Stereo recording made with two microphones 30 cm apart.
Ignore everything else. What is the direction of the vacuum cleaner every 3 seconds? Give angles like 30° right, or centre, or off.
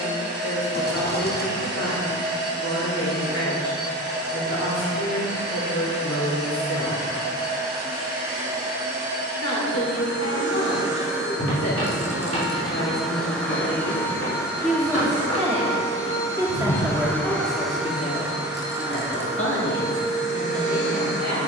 40° right, 40° right, 30° right, 20° right, centre, 10° left, 30° right.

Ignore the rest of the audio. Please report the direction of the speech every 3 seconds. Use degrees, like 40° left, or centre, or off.
70° left, 70° left, 70° left, 70° left, 40° left, centre, 50° left.